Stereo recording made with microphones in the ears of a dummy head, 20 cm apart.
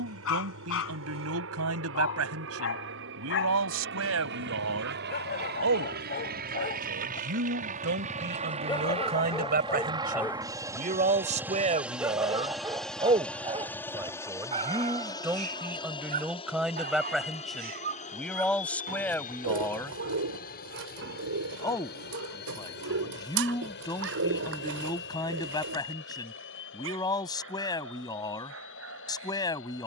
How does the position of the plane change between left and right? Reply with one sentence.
In this clip you hear the plane move from right to left.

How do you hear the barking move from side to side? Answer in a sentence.
In this clip you hear the barking move to the right.